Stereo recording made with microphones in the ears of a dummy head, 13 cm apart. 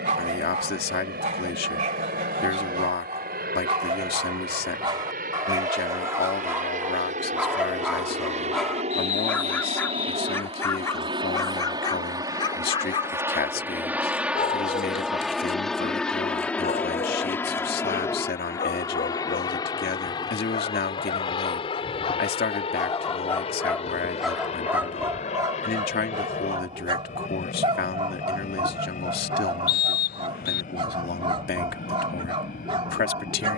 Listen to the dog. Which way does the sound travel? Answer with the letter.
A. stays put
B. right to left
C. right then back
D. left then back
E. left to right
D.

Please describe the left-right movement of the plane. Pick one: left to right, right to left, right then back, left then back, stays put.
right to left.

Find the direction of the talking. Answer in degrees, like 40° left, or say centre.
70° left.